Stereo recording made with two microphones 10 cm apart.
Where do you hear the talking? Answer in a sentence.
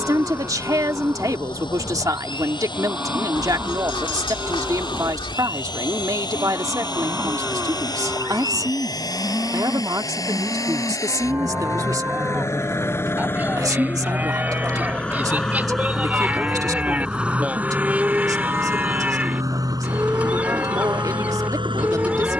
In this clip you hear the talking on the right.